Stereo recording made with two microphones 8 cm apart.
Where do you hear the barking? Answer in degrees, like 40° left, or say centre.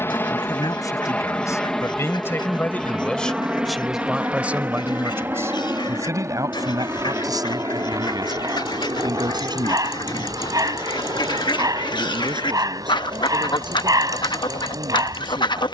50° right.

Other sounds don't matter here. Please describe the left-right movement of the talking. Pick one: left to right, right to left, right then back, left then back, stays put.
left to right.